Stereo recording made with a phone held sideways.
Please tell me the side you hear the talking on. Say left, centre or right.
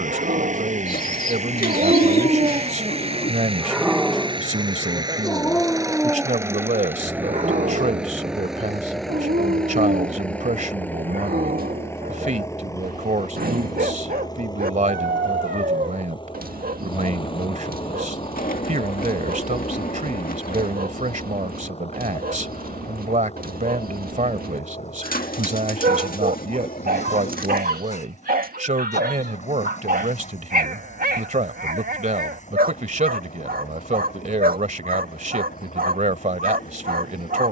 right.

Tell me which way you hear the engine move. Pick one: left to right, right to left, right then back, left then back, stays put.
right to left.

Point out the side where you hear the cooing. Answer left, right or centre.
left.